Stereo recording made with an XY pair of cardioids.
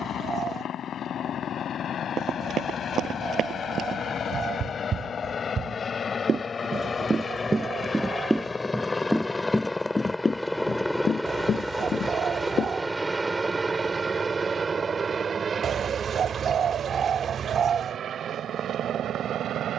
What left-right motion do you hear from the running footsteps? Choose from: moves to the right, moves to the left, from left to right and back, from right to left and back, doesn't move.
moves to the left.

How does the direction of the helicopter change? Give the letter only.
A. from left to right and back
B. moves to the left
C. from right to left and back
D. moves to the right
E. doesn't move
D.